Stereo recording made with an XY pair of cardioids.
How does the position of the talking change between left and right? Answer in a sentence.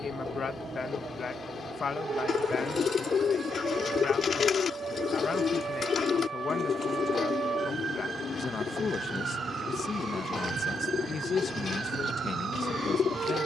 In this clip you hear the talking stay put.